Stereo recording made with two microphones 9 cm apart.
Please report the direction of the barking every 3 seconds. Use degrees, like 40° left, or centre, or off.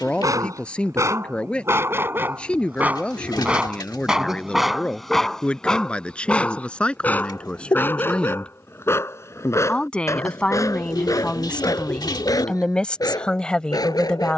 30° right, centre, 20° left, 40° left, 50° left.